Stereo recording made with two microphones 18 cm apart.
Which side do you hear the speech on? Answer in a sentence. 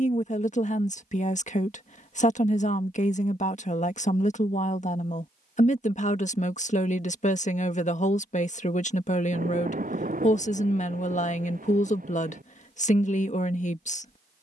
In this clip you hear the speech on the left.